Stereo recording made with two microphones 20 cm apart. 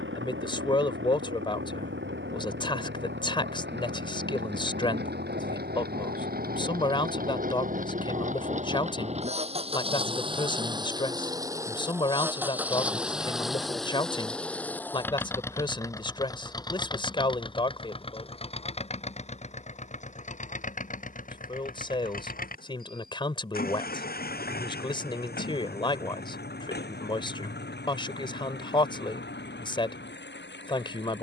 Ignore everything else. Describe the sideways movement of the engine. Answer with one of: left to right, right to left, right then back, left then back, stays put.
right to left.